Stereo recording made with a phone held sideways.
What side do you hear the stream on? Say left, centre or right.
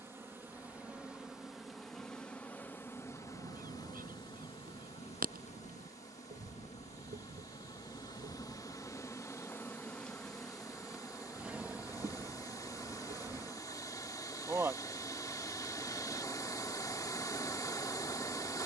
left.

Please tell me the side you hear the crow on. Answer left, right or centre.
right.